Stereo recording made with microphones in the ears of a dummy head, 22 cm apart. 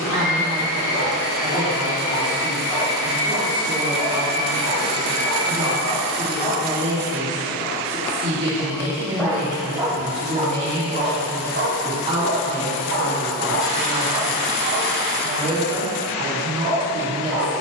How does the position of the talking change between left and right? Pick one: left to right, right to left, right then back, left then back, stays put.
stays put.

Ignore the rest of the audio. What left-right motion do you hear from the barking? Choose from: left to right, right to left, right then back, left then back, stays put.
left to right.